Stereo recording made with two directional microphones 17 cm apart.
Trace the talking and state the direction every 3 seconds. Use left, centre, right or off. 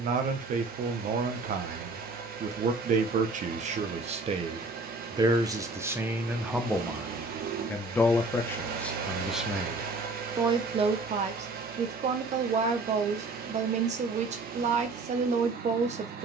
right, right, centre, right, right, right.